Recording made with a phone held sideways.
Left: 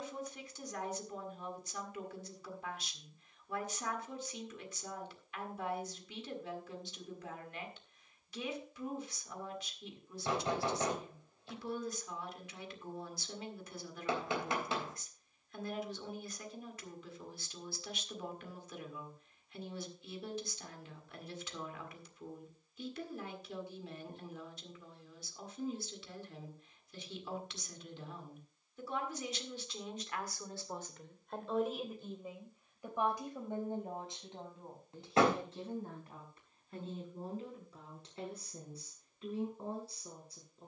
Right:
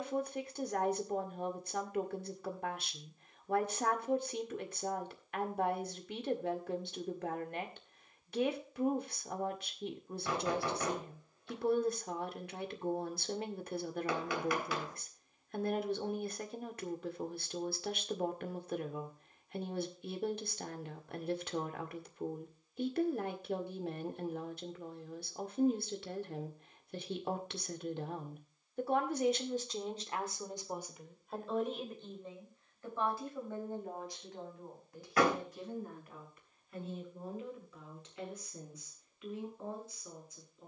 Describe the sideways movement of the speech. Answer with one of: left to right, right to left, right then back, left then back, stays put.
right to left.